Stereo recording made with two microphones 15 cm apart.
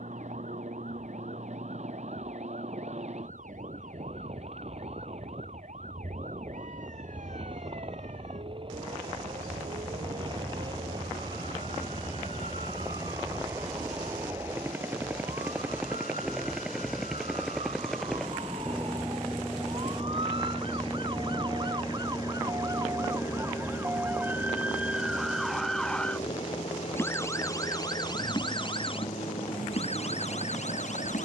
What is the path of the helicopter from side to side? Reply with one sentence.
You can hear the helicopter go from the right side to the left.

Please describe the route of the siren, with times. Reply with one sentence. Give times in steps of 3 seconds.
In this clip you hear the siren on the right from 0 s, in the centre from 24 s and on the left from 27 s.